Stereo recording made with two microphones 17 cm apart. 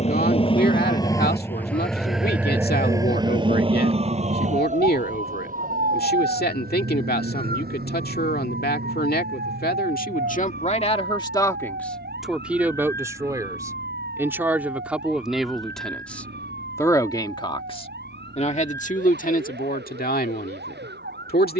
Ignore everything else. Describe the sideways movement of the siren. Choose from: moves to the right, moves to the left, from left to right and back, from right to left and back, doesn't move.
moves to the right.